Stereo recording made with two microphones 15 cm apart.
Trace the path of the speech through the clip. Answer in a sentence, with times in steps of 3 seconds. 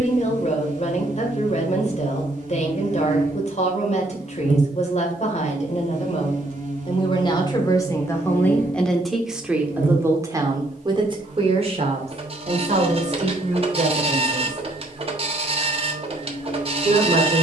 You can hear the speech on the left from 0 s and on the right from 9 s.